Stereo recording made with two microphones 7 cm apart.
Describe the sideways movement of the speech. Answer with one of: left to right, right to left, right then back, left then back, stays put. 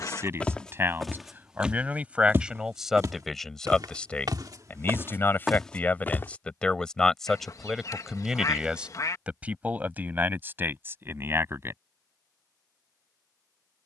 left then back.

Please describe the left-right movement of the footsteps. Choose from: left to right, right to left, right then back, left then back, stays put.
right then back.